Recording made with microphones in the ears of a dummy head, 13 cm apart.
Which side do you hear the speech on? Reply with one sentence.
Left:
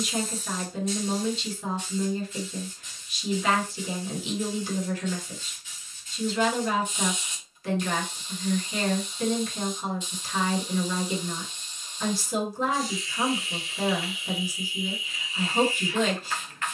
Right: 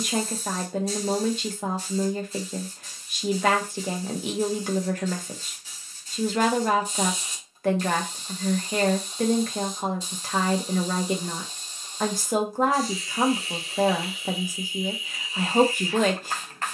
In this clip you hear the speech on the right.